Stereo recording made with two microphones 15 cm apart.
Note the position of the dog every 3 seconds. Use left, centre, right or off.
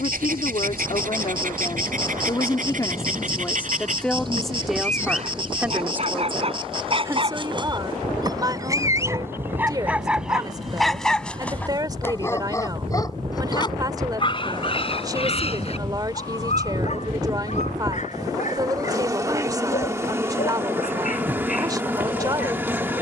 right, right, right, centre, left, left, left, left.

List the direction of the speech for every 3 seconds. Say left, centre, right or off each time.
left, centre, right, right, right, right, right, right.